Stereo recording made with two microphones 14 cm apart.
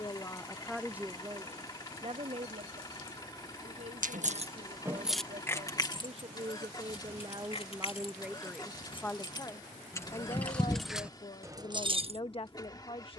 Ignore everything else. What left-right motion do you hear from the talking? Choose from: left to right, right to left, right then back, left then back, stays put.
right then back.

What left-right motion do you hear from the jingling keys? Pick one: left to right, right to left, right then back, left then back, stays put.
left then back.